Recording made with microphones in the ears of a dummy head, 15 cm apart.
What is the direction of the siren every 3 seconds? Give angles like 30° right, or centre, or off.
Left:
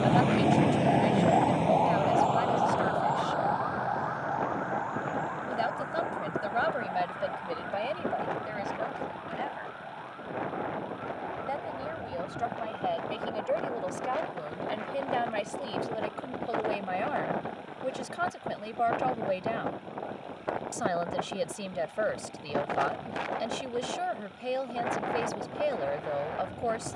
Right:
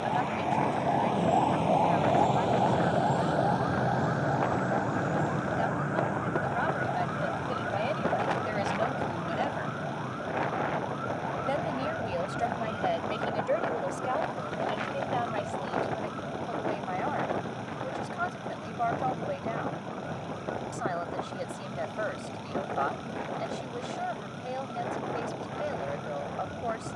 10° left, 40° right, 50° right, 60° right, 60° right, 60° right, 60° right, 60° right, 60° right.